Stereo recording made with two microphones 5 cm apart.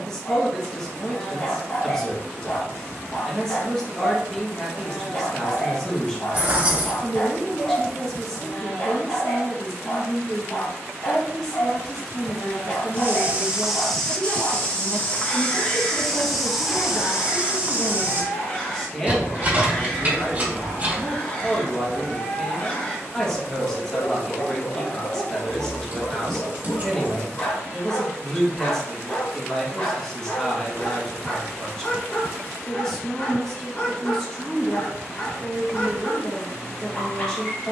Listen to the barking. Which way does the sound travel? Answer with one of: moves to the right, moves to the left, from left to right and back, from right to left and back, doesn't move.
doesn't move.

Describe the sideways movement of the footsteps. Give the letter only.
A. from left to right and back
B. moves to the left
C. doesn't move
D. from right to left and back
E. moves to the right
D.